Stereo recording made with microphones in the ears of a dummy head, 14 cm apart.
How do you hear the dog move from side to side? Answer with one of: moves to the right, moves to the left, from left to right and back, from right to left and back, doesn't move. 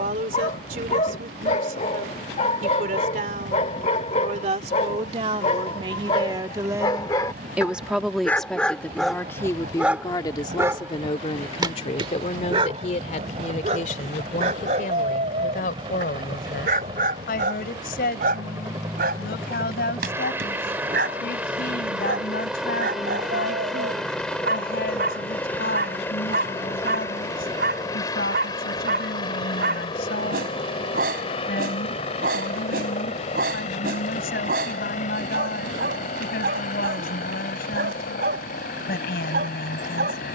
moves to the right.